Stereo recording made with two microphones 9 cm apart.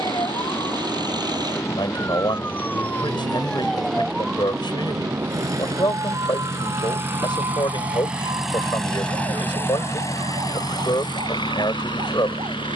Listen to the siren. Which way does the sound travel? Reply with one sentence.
You can hear the siren go from the left side to the right.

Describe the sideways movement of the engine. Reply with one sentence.
You can hear the engine move from right to left.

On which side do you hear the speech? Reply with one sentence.
You can hear the speech on the left.